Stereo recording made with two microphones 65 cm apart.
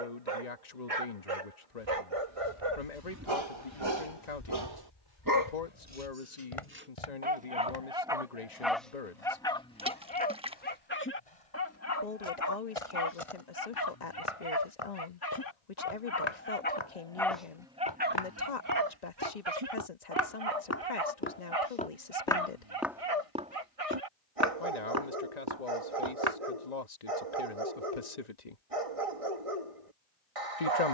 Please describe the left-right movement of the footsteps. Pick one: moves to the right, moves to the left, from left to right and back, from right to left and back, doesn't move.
from right to left and back.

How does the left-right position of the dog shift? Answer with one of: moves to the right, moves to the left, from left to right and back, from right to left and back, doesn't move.
from right to left and back.